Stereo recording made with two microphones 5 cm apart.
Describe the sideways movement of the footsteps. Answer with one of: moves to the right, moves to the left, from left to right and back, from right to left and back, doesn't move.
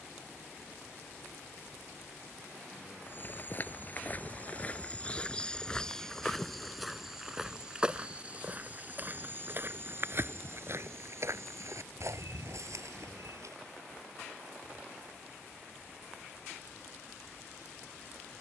moves to the right.